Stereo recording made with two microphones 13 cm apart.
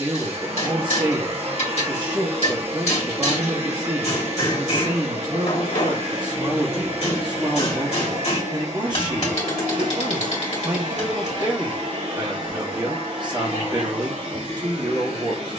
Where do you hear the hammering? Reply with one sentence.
You can hear the hammering on the left.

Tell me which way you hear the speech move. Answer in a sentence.
You can hear the speech stay put.